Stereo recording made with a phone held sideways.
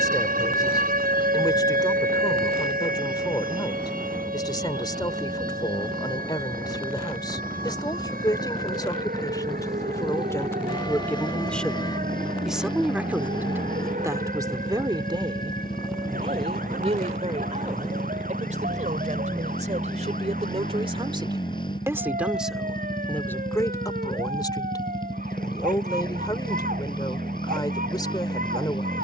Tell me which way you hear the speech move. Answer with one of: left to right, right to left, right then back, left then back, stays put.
right then back.